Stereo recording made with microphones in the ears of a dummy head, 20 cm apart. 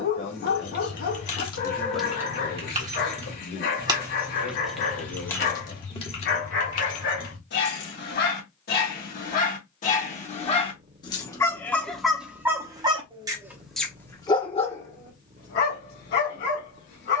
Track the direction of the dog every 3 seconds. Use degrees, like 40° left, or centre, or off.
60° left, 60° left, 50° left, 30° left, centre, 50° left.